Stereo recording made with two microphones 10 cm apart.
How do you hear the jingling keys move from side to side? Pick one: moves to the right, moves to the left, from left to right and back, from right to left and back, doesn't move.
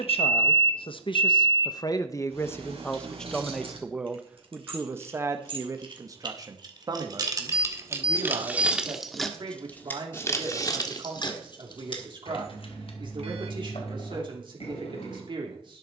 moves to the left.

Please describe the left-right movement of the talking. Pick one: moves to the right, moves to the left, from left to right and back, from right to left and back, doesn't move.
moves to the right.